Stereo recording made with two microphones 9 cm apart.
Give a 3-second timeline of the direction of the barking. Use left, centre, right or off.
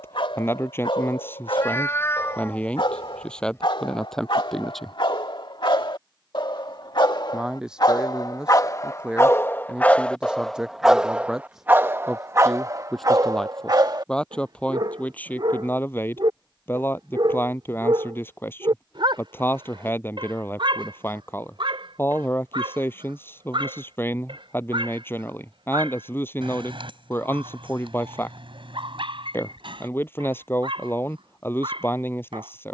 left, left, left, centre, right, right, right, right, right, right, right.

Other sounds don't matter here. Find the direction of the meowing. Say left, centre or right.
left.